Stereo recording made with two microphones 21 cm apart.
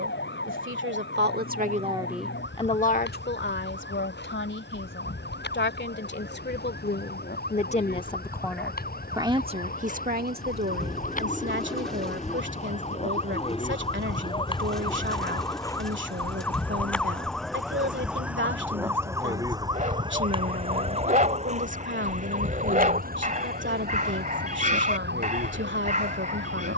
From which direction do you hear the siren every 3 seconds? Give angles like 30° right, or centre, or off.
60° left, 60° left, 50° left, 40° left, 30° left, 10° left, 20° right, 40° right, 50° right.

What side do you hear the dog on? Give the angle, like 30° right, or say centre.
40° right.